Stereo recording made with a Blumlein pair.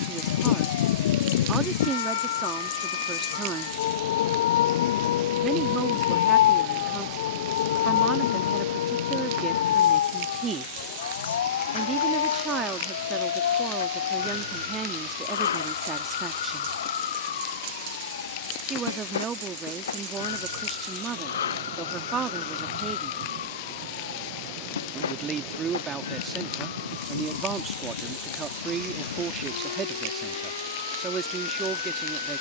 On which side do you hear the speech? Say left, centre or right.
right.